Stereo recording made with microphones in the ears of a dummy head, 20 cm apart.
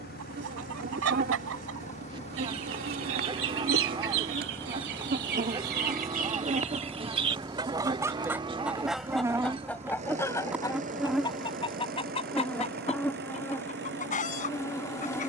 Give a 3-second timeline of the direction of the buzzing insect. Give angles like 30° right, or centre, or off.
40° right, 40° right, 20° right, 10° right, 10° left.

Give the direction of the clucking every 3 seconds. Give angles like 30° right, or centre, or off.
70° right, 60° right, 20° right, 10° left, 30° left.